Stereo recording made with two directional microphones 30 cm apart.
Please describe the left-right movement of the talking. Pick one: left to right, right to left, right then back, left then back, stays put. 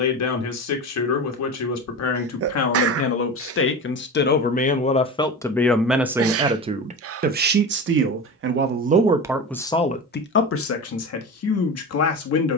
right then back.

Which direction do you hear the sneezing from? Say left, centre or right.
right.